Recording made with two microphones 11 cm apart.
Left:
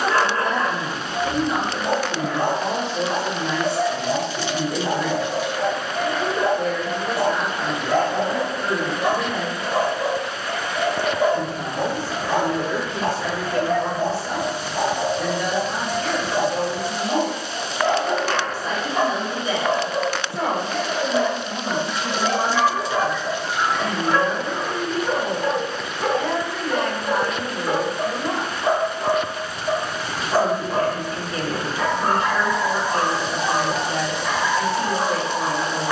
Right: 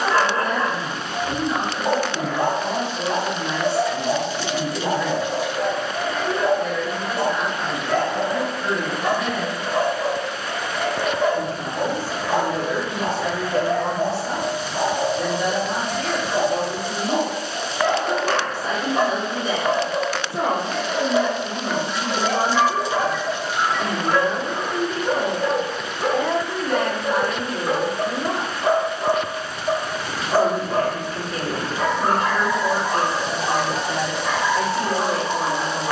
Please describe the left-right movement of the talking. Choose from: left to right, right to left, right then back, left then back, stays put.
left to right.